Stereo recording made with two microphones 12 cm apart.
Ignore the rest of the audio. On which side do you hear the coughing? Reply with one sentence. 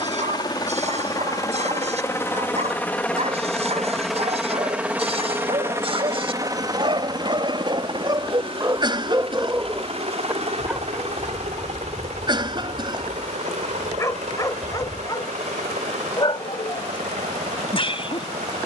In this clip you hear the coughing on the right.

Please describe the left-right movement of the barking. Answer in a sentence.
In this clip you hear the barking move from right to left.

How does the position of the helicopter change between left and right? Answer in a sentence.
You can hear the helicopter move from left to right.